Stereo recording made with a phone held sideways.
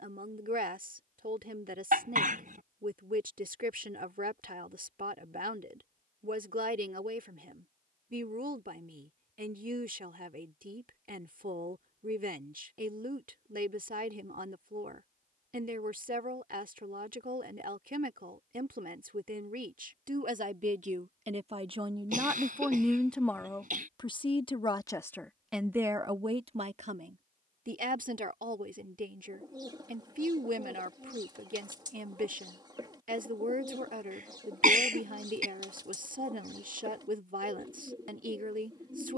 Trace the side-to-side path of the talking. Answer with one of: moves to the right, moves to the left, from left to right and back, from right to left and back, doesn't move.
from right to left and back.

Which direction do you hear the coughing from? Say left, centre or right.
right.